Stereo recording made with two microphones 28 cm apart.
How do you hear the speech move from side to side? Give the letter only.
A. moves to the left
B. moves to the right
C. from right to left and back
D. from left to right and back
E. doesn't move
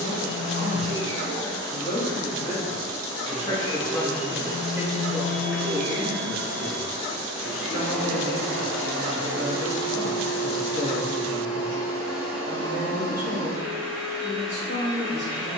B.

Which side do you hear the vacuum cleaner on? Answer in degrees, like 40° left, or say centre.
60° right.